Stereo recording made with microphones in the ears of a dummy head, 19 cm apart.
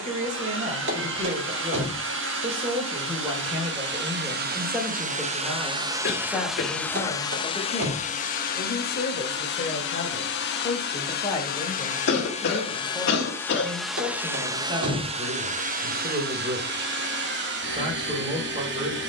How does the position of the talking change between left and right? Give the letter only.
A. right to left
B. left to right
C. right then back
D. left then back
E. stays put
D.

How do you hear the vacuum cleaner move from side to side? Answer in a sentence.
In this clip you hear the vacuum cleaner go left and come back.